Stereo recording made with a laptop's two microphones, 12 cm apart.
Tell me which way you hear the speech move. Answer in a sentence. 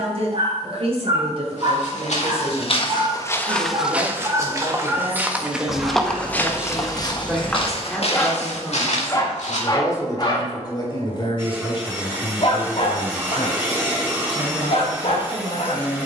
In this clip you hear the speech move from right to left.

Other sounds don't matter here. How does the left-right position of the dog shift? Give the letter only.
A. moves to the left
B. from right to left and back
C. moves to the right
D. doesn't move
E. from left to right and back
A.